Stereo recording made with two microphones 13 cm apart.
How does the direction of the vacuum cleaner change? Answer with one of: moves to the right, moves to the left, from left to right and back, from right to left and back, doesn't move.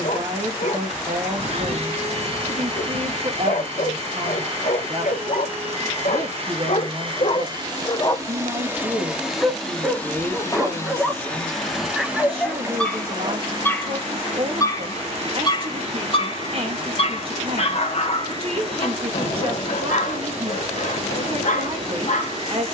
from right to left and back.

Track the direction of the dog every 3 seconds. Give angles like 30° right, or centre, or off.
80° left, 80° left, 50° left, centre, 10° left, 50° left, 70° left, 80° left.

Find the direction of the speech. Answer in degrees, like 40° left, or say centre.
40° right.